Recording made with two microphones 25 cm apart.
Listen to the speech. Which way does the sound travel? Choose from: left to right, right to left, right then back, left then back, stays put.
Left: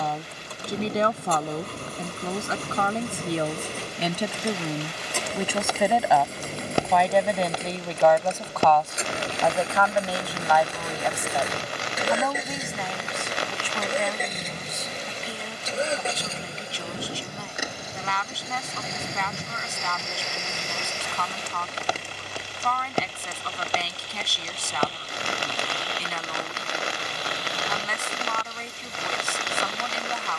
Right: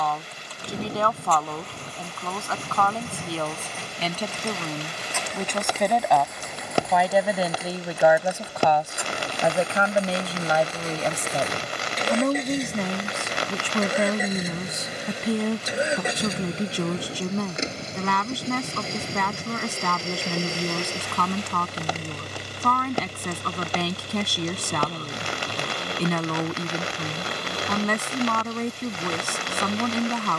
left to right.